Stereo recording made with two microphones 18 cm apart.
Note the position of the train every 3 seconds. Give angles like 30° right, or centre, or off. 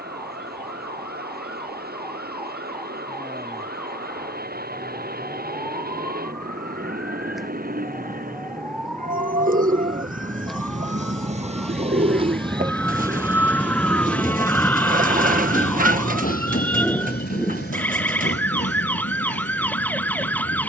70° right, 70° right, 60° right, 50° right, 10° right, 50° left, 80° left.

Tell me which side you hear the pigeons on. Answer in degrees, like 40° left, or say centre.
50° right.